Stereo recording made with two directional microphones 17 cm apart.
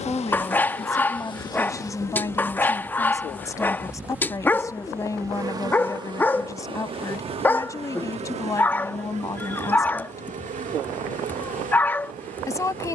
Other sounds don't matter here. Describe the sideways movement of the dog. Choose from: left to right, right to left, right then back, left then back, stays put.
stays put.